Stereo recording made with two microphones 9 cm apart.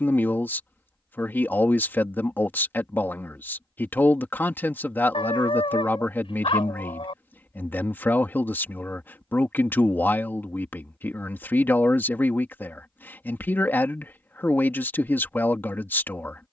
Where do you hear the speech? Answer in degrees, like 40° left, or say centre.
20° left.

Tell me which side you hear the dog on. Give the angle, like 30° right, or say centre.
70° left.